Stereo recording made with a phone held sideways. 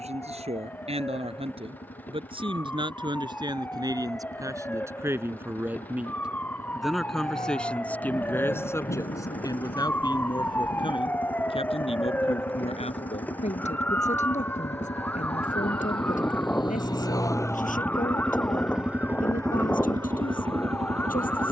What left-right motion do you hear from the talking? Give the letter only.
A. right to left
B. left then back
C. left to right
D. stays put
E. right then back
A.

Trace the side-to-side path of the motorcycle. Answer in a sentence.
You can hear the motorcycle travel towards the right.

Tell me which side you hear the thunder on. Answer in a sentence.
In this clip you hear the thunder on the left.